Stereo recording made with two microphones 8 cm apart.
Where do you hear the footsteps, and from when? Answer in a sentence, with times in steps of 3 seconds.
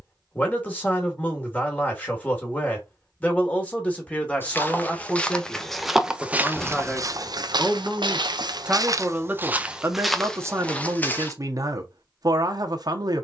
In this clip you hear the footsteps not at all from 0 s, in the centre from 3 s, on the right from 6 s, in the centre from 9 s and not at all from 12 s.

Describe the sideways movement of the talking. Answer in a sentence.
You can hear the talking move to the right.